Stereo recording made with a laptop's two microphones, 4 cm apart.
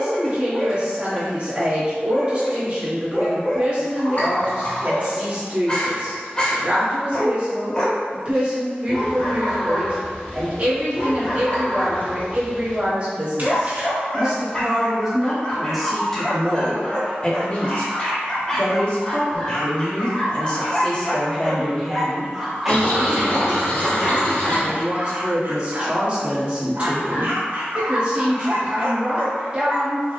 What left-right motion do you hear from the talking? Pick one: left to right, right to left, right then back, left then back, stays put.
left then back.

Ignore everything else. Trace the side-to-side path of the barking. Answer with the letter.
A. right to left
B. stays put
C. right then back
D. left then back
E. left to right
E.